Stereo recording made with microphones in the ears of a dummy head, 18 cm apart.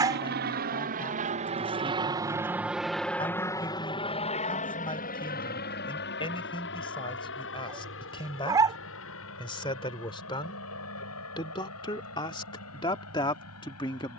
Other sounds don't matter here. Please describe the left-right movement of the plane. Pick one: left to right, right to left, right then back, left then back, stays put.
right to left.